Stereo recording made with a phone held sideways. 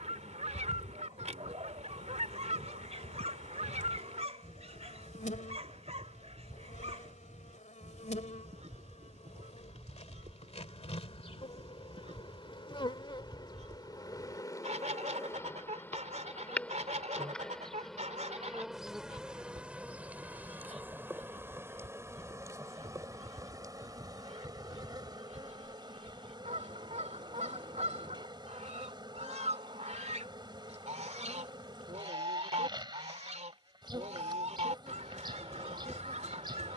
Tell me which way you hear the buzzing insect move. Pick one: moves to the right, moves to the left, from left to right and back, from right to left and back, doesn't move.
moves to the right.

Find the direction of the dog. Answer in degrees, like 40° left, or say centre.
50° right.